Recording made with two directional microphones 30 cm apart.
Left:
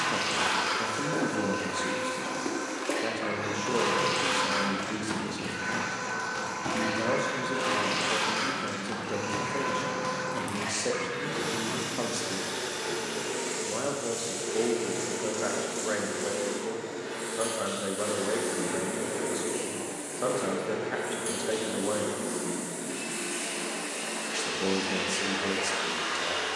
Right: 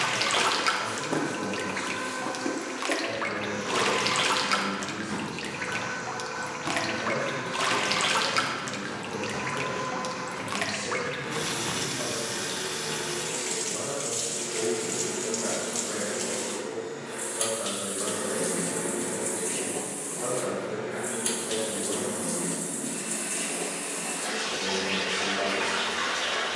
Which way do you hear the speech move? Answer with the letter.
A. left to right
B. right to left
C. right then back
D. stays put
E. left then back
D.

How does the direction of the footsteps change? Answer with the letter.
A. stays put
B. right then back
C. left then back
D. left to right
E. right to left
C.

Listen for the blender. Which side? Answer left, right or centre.
left.